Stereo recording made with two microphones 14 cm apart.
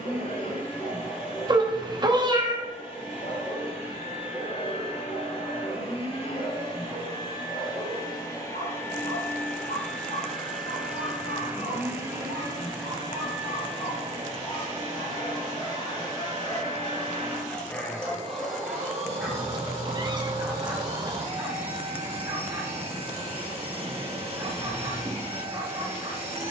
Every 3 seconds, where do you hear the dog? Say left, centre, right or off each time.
left, left, left, left, left, left, centre, right, right.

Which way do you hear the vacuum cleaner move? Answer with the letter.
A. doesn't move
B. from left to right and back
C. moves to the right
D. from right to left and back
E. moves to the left
C.